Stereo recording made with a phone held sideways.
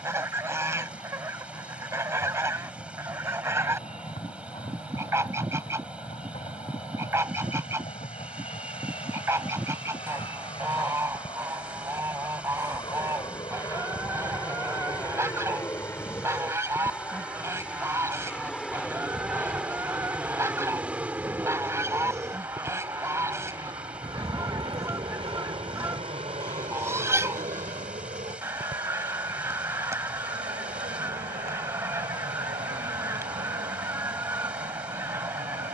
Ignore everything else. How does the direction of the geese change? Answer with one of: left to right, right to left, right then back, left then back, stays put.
stays put.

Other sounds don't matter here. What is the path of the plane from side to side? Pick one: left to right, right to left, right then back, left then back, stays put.
left to right.